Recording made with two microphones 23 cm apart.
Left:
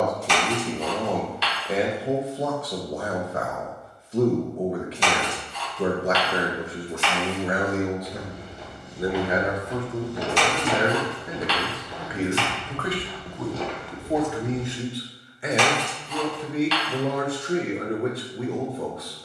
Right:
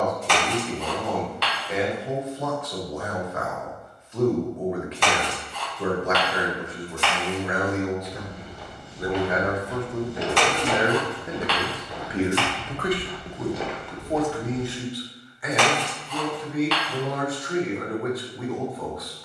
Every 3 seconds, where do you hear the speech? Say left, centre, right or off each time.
left, left, left, centre, centre, left, left.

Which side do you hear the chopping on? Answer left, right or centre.
right.